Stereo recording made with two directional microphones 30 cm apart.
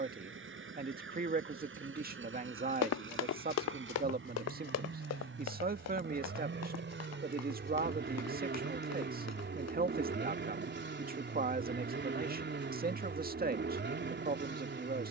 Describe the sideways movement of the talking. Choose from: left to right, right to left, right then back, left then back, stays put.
stays put.